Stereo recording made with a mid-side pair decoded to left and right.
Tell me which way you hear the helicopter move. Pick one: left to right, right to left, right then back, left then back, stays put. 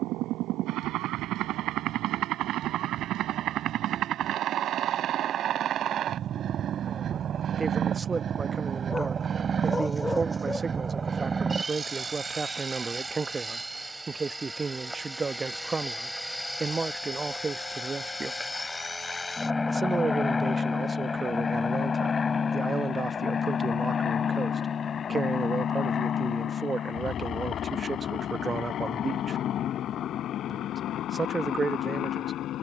right to left.